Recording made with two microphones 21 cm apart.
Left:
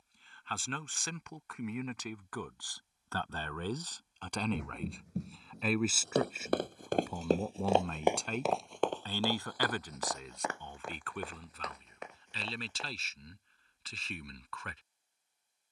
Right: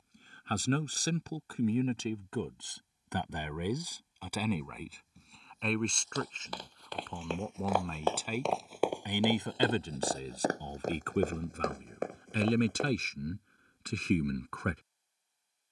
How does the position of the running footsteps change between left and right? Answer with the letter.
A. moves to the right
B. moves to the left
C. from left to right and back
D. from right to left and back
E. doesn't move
A.